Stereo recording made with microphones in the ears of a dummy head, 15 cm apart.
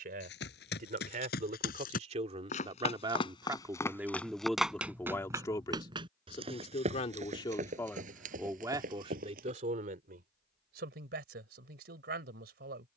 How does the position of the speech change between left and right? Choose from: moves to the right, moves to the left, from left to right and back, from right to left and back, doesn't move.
from right to left and back.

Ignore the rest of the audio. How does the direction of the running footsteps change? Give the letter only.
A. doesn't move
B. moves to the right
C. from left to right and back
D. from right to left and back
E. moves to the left
B.